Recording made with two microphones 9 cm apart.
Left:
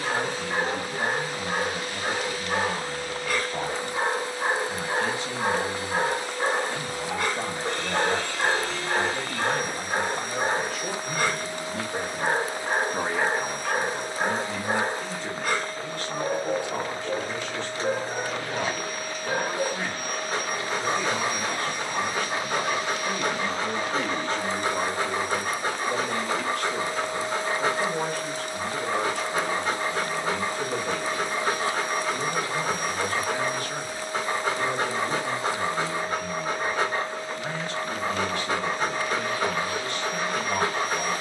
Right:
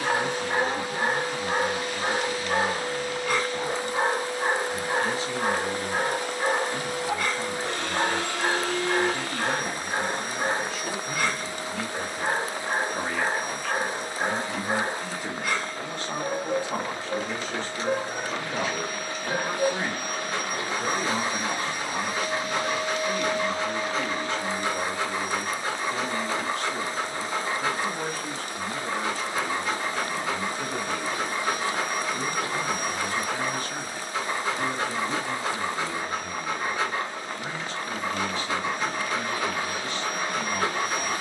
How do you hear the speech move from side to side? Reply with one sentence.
You can hear the speech move from left to right and back again.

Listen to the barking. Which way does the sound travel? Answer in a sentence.
You can hear the barking move to the left.